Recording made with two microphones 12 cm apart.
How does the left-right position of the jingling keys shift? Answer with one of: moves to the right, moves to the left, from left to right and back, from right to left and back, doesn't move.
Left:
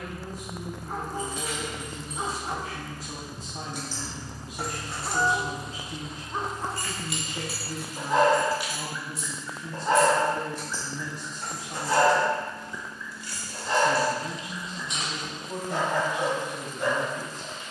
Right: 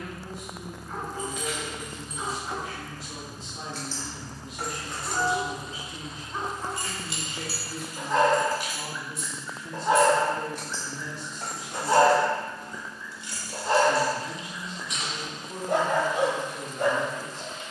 from left to right and back.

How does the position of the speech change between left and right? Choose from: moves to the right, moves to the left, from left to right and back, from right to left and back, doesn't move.
doesn't move.